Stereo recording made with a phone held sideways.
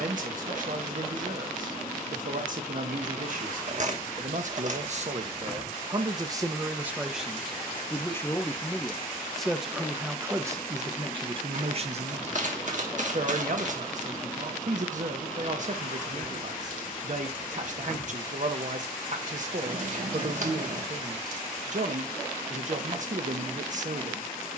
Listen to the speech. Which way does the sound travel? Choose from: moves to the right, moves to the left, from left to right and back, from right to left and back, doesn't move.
from right to left and back.